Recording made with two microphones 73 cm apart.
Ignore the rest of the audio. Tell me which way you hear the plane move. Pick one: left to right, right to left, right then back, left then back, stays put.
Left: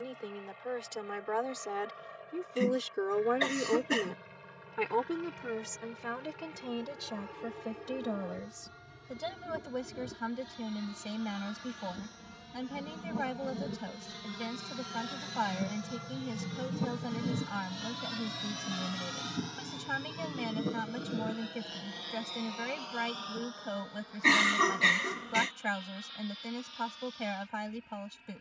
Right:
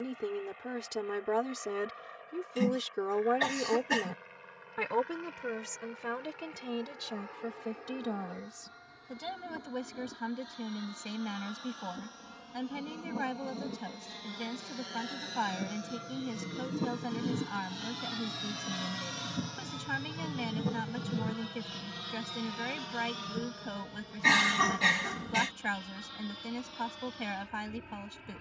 left to right.